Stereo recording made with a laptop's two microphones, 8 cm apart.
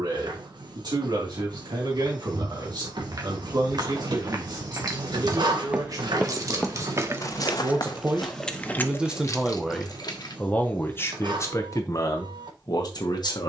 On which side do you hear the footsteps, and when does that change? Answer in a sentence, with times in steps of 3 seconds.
You can hear the footsteps on the right from 0 s, on the left from 6 s and not at all from 9 s.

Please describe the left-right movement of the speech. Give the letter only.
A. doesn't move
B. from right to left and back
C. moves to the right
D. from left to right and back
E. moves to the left
E.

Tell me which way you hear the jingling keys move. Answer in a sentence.
You can hear the jingling keys move from right to left.